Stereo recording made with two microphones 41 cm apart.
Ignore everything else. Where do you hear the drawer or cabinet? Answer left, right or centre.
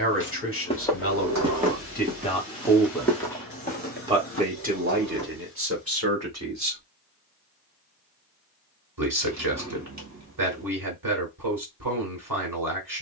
right.